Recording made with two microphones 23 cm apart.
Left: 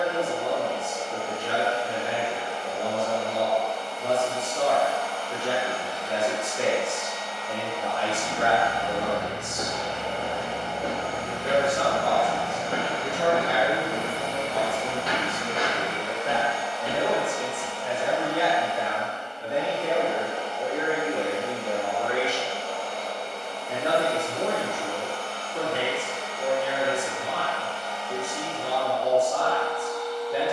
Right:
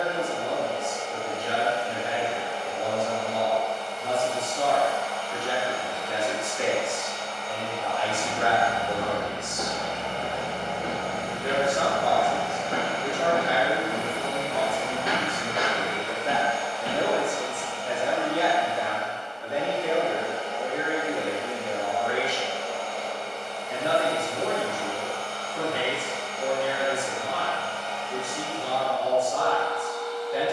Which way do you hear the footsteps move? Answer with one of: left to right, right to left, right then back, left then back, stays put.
left then back.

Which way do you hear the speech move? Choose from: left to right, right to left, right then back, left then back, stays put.
right then back.